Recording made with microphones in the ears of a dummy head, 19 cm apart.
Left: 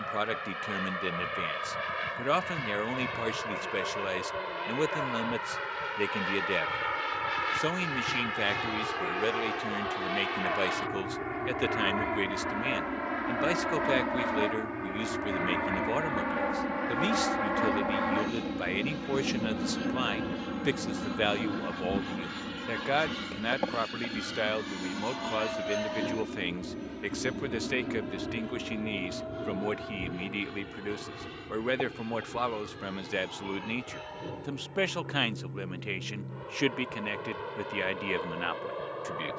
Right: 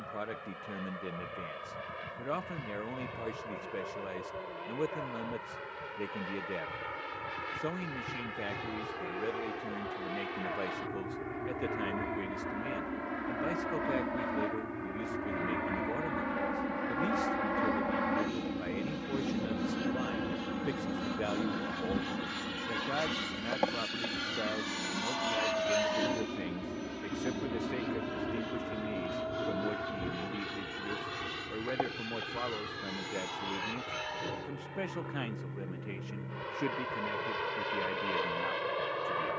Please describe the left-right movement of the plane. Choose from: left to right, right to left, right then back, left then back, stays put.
left to right.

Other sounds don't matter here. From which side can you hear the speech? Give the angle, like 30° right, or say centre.
70° left.